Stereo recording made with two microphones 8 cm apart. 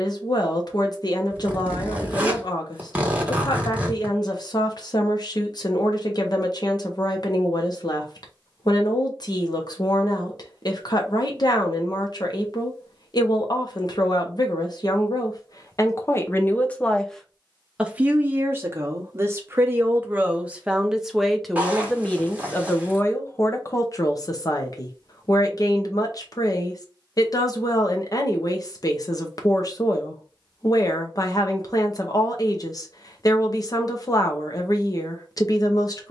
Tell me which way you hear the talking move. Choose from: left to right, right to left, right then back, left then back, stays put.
right then back.